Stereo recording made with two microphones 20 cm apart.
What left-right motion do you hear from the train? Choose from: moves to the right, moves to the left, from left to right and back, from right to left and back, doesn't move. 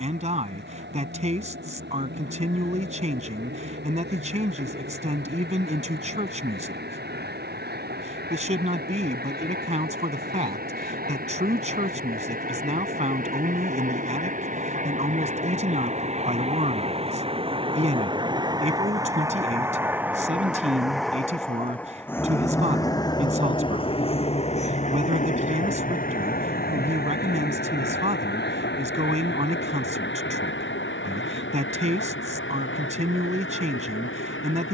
moves to the left.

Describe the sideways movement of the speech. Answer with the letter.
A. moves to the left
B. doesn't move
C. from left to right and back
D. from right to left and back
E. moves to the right
B.